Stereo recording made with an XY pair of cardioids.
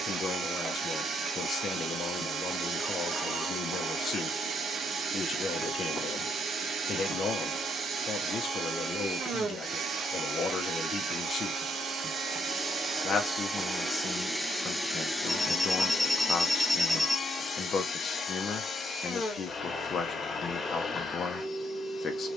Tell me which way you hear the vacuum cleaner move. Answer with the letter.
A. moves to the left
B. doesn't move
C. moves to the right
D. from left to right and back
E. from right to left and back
A.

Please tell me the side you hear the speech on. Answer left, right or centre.
left.